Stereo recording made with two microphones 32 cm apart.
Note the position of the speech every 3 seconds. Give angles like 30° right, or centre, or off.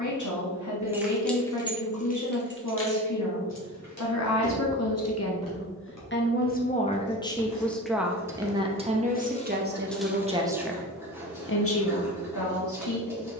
60° left, 50° left, 10° left, centre, 60° left.